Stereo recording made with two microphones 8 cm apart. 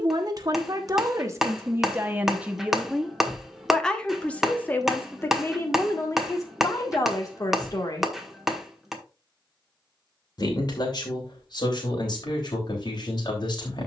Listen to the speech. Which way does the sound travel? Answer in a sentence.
You can hear the speech move from right to left.